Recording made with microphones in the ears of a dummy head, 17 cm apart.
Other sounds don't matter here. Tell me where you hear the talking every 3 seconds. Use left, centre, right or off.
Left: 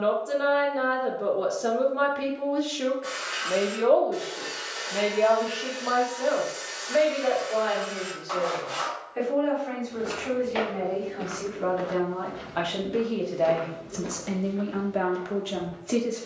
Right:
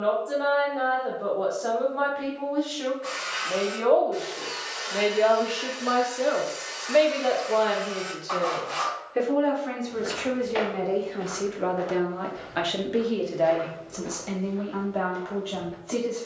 left, centre, right, right, centre, left.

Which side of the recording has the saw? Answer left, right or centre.
centre.